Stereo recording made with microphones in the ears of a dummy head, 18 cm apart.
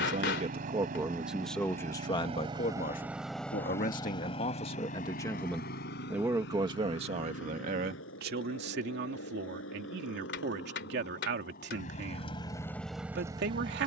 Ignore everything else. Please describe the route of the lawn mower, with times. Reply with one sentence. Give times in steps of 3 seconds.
In this clip you hear the lawn mower on the right from 0 s, on the left from 3 s and in the centre from 12 s.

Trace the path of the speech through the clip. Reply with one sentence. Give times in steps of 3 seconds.
In this clip you hear the speech in the centre from 0 s, on the left from 3 s and on the right from 6 s.